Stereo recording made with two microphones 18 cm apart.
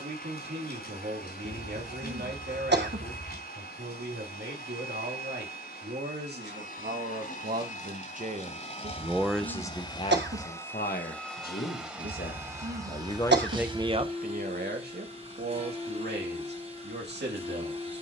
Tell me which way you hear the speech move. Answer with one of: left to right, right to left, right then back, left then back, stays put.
left then back.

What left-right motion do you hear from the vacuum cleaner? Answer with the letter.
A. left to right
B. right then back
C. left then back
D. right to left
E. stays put
A.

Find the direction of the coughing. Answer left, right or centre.
right.